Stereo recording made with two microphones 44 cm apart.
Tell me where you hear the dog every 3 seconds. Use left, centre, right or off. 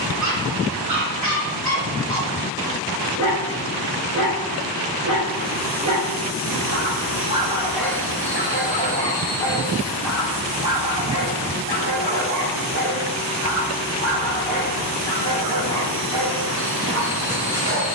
right, right, centre, centre, right, right.